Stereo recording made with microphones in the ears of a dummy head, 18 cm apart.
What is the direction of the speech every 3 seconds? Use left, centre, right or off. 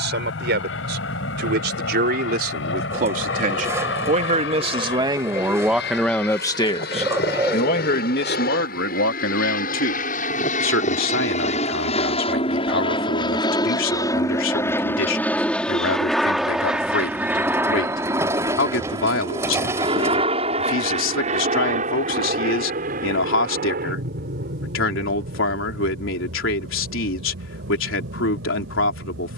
right, right, left, left, left, left, left, left, left, left.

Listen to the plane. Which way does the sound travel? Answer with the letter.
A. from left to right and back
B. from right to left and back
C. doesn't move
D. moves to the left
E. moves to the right
E.